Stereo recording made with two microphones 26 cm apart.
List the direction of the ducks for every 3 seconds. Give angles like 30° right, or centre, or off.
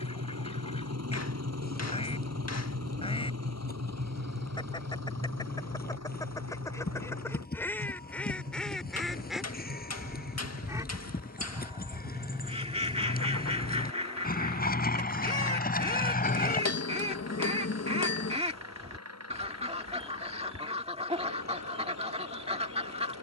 20° left, 20° left, 10° left, 10° right, 20° right, 20° right, 20° right, 20° right.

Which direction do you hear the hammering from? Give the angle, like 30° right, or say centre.
80° left.